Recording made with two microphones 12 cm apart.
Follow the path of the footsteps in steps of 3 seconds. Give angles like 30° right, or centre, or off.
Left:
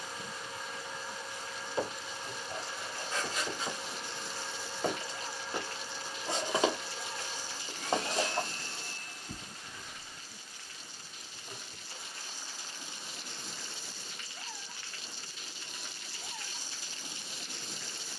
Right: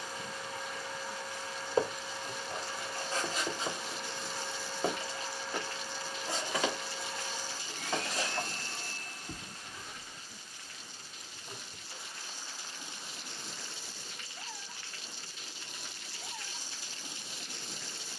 40° right, 20° right, 30° left, 40° right, off, off.